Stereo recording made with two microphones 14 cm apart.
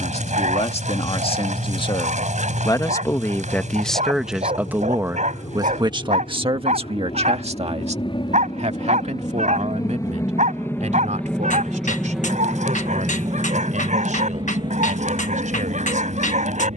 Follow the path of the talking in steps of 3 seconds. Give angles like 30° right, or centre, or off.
40° left, 10° right, 50° right, 70° right, 80° right, 80° right.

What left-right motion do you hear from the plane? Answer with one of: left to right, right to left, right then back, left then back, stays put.
left to right.